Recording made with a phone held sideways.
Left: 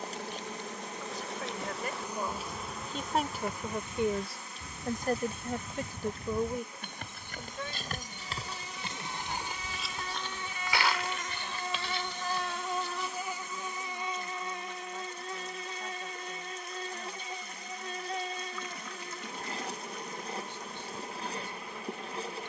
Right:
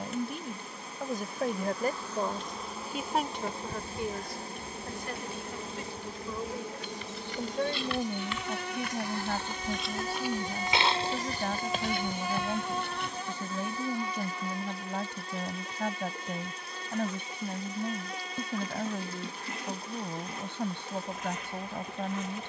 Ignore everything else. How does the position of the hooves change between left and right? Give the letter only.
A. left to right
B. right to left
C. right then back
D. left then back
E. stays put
A.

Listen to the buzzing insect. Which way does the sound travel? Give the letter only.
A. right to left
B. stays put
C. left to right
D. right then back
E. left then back
D.